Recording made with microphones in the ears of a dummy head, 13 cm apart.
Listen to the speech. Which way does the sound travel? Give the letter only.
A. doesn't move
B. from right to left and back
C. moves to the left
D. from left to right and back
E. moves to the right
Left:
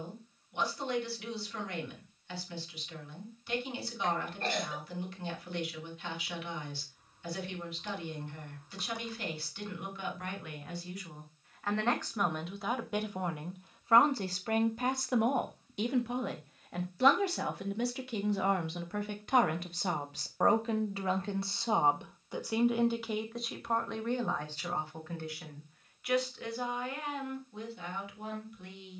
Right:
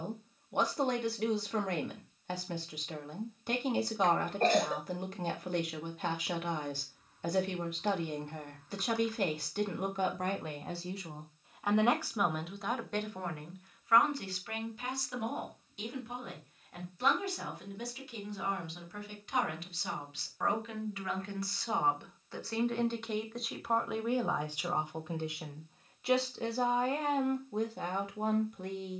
B.